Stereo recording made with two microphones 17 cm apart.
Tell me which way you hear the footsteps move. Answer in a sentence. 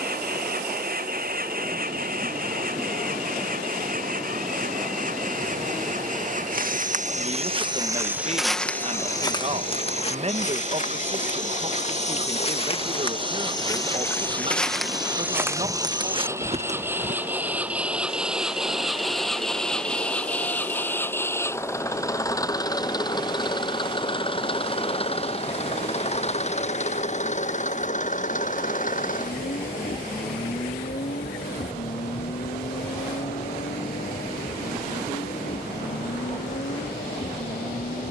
You can hear the footsteps go left and come back.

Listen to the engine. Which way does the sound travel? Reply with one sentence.
You can hear the engine travel towards the left.